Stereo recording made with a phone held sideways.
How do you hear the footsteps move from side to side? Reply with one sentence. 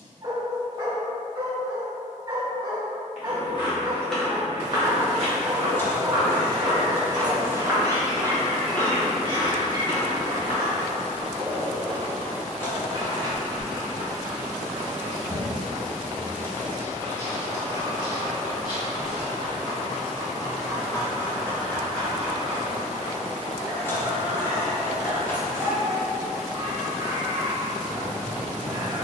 In this clip you hear the footsteps move from left to right and back again.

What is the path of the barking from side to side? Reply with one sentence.
In this clip you hear the barking move from right to left and back again.